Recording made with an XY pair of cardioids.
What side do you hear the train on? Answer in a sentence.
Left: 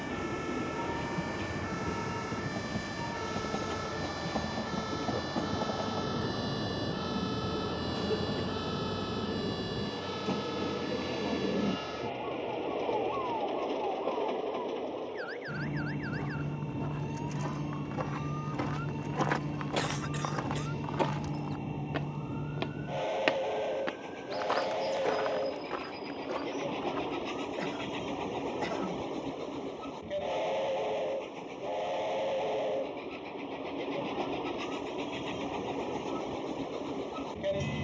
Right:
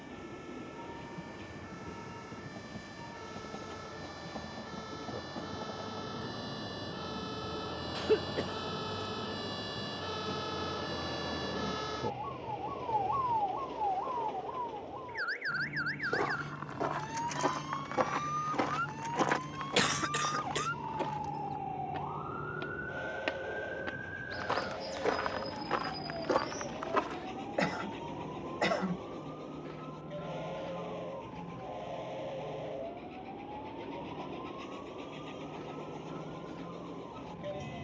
You can hear the train on the left.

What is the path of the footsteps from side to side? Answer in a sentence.
You can hear the footsteps go left and come back.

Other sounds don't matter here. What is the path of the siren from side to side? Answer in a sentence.
You can hear the siren move from left to right.